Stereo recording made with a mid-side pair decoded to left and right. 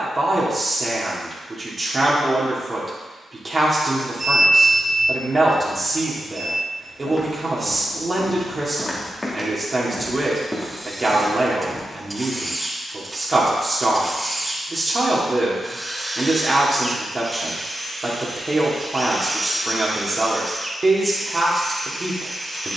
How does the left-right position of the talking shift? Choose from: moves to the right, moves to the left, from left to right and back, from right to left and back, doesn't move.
doesn't move.